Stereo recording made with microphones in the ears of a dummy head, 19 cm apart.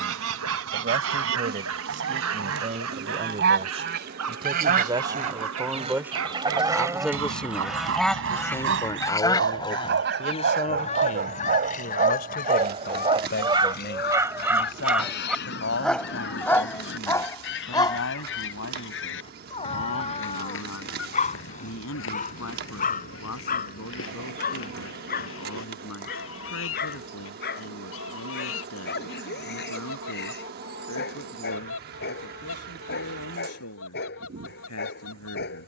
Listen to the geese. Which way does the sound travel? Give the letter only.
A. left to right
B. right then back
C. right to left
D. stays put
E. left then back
C.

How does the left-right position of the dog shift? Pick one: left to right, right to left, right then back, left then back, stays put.
right to left.